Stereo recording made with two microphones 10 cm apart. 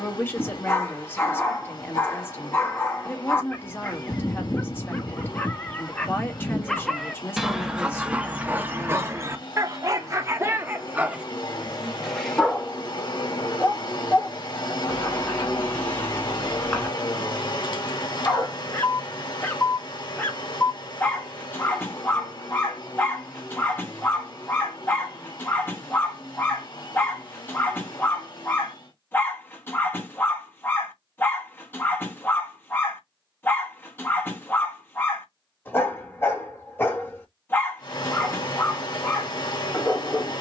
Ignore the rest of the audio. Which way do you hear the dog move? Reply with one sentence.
In this clip you hear the dog go right and come back.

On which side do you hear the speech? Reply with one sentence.
In this clip you hear the speech on the left.